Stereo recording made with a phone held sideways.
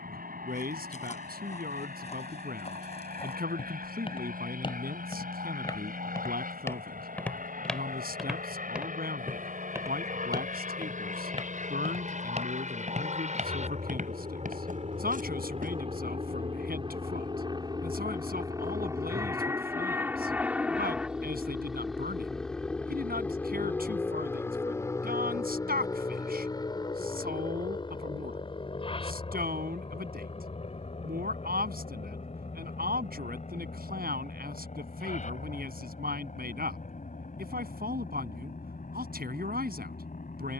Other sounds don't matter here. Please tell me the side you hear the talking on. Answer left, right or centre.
right.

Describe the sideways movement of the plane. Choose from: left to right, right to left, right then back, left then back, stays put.
right to left.